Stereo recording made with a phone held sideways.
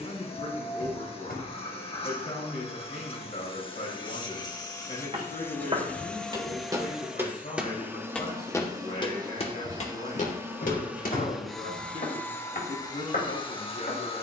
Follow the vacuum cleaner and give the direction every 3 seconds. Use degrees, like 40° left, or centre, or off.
40° left, 30° left, 10° right, 10° right, 30° left.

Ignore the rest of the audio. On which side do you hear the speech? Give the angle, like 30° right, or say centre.
70° left.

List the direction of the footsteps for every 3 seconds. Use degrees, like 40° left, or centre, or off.
off, 40° right, 10° right, 50° left, 80° left.